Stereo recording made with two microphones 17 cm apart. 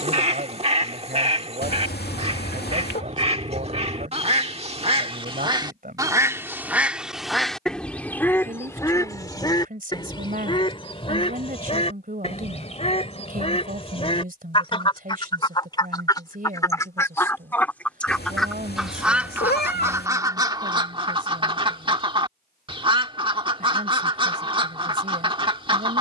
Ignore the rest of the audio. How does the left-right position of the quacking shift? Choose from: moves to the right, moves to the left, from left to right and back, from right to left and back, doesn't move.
from right to left and back.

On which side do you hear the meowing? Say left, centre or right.
left.